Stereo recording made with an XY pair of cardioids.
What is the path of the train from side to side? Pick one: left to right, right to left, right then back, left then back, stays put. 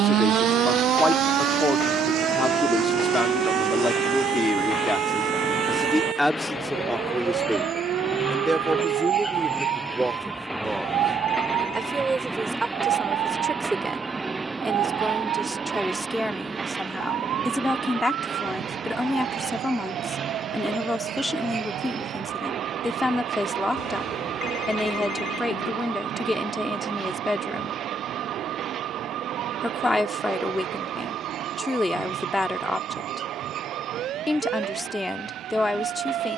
left to right.